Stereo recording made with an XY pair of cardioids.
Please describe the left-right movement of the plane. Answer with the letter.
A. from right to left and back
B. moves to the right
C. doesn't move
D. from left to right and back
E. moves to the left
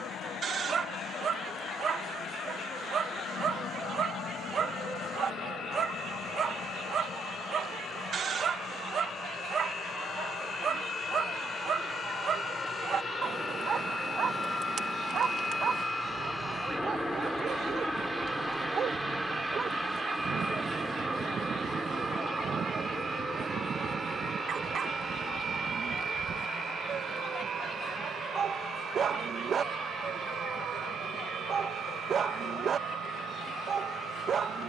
B.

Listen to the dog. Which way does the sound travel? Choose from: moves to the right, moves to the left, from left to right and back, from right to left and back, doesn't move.
doesn't move.